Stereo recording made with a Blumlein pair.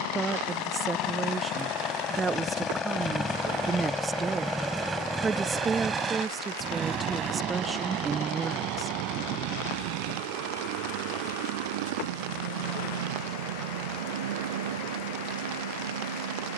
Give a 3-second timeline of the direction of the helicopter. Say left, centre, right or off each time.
left, centre, right, right, right, right.